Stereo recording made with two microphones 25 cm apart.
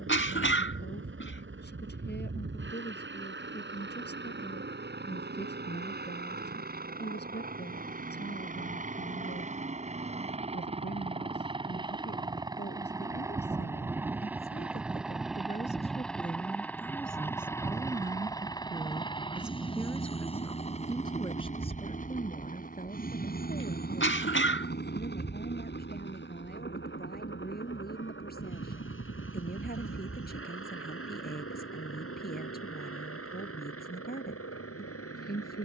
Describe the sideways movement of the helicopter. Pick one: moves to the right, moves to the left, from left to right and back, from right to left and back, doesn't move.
moves to the left.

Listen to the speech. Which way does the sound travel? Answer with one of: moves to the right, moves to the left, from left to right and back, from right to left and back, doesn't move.
from left to right and back.